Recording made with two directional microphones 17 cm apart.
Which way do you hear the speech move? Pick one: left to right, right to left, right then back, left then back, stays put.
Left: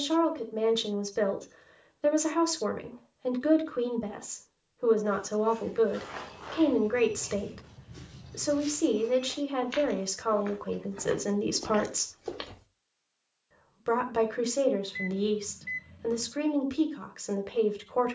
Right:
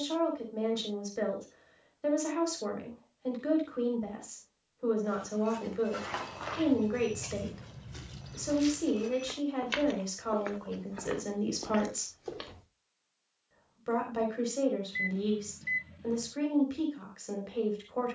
stays put.